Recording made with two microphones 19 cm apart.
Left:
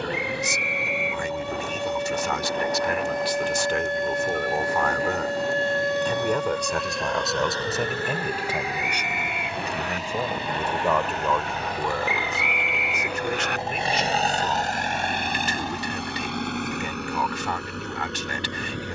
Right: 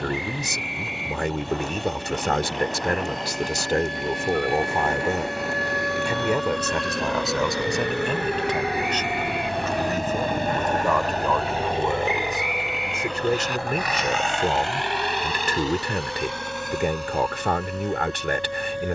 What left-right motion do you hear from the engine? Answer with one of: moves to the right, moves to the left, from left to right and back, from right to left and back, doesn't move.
moves to the left.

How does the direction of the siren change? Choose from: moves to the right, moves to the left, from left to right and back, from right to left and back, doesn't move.
moves to the right.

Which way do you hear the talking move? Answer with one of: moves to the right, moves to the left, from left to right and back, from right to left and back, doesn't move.
from right to left and back.